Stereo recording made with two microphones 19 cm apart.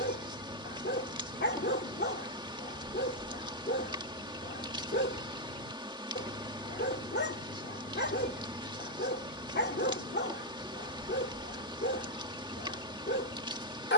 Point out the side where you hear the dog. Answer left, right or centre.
left.